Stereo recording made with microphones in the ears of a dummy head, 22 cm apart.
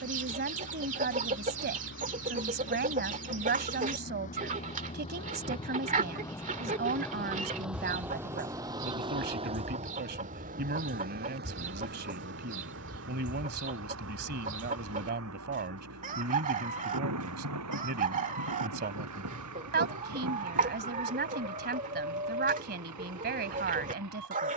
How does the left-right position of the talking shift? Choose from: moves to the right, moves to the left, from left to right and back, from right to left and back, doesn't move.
doesn't move.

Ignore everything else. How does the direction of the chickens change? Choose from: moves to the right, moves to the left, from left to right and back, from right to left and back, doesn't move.
doesn't move.